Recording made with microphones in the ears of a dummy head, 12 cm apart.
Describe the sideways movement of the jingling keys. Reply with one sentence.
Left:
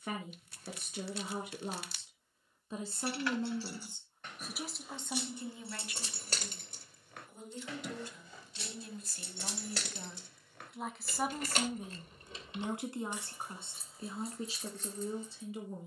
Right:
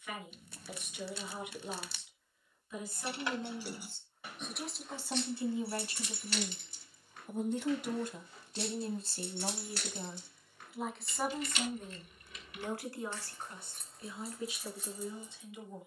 In this clip you hear the jingling keys move from right to left and back again.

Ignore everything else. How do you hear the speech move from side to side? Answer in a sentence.
You can hear the speech go right and come back.